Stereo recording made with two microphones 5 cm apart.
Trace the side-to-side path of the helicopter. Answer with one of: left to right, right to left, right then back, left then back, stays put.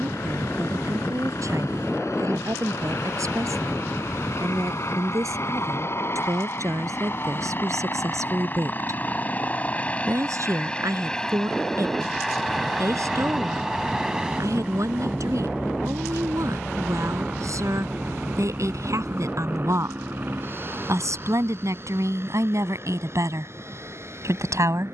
left to right.